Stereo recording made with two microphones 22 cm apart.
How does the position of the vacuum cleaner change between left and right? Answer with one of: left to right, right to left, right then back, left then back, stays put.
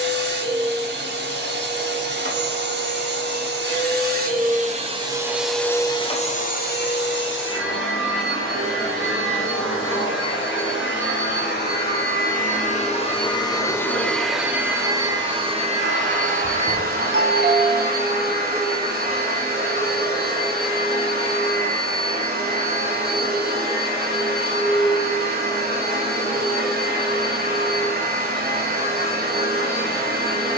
left then back.